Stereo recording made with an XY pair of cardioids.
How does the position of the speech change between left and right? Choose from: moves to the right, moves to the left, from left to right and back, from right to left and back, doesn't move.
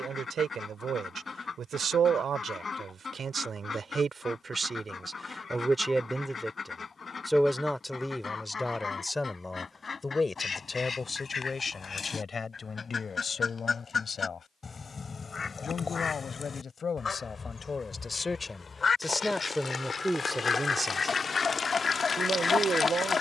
from right to left and back.